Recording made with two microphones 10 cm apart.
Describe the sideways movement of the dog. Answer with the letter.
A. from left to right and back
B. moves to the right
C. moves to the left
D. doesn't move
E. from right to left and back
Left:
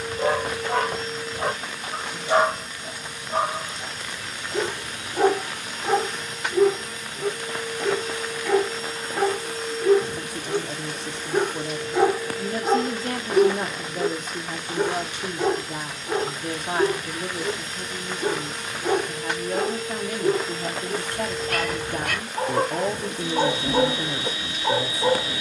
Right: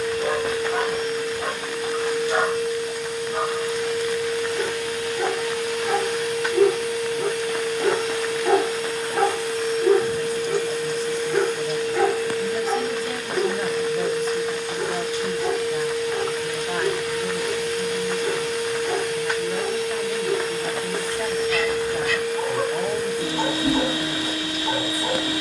A.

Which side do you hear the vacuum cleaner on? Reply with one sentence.
You can hear the vacuum cleaner on the right.